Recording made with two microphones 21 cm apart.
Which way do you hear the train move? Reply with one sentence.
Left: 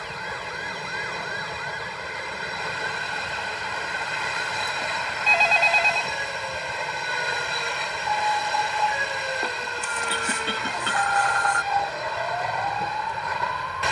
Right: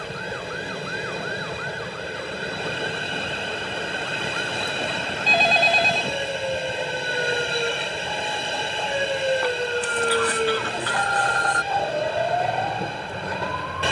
In this clip you hear the train stay in one place.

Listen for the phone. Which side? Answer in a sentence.
In this clip you hear the phone on the right.